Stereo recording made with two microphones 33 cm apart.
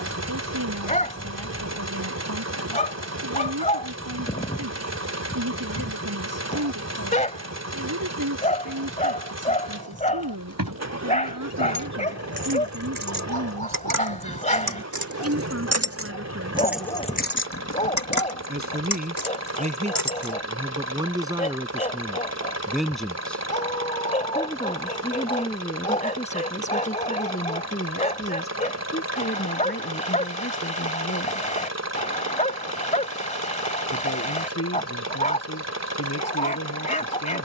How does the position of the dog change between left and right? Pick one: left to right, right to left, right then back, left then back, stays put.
stays put.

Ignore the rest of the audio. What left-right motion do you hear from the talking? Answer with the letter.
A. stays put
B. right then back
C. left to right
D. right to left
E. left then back
D.